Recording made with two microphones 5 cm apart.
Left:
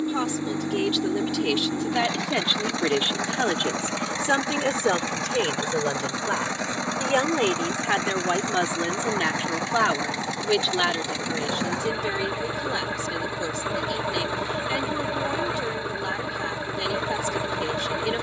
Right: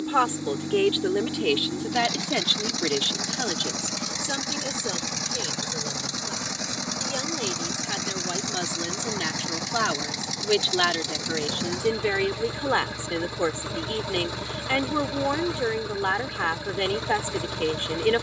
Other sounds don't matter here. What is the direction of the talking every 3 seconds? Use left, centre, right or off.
centre, left, left, centre, right, right.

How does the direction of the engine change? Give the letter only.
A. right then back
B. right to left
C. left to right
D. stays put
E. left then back
D.